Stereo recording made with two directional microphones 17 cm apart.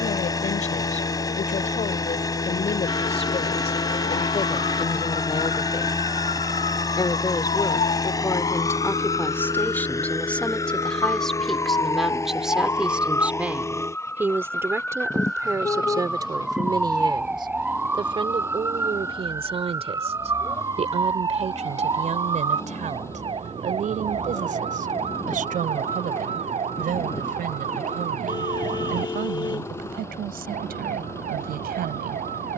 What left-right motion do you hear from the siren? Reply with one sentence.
In this clip you hear the siren go from the left side to the right.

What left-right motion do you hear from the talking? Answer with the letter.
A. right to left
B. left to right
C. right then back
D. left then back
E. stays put
B.